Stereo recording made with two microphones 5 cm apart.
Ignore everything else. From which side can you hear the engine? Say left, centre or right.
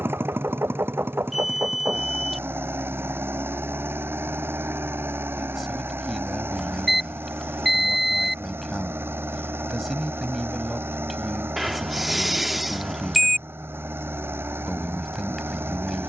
right.